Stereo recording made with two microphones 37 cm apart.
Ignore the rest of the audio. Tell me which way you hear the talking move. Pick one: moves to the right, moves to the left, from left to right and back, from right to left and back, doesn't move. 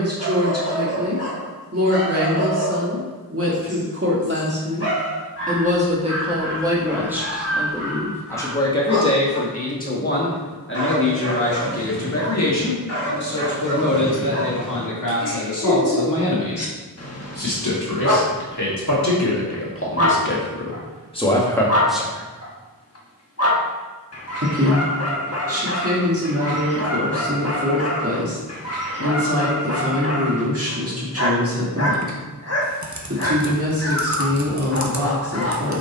from right to left and back.